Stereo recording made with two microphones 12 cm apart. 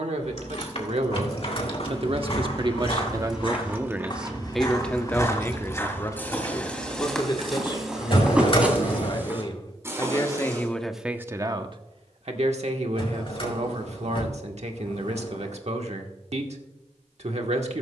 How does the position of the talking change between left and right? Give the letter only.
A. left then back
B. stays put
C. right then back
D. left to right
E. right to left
A.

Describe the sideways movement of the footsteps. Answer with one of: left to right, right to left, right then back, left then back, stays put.
left to right.